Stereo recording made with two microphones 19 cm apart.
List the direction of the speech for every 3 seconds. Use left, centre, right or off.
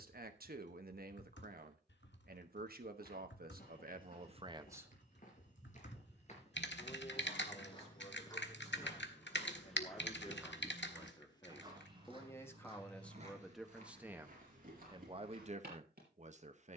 right, right, left, left, centre, right.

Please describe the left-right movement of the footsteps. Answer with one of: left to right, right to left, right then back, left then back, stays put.
left to right.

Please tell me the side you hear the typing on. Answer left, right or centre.
left.